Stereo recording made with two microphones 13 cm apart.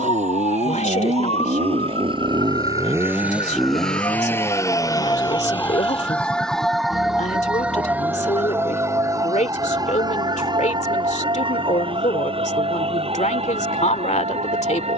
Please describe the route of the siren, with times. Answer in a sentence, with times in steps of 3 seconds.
In this clip you hear the siren on the left from 0 s, in the centre from 6 s and on the right from 9 s.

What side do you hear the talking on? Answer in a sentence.
You can hear the talking on the left.